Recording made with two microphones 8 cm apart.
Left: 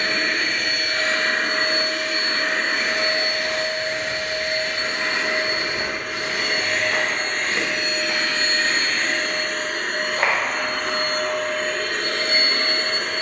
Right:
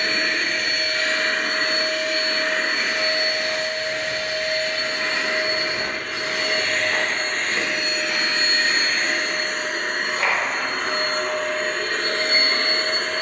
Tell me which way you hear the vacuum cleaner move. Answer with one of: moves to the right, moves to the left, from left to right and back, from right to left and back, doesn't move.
moves to the right.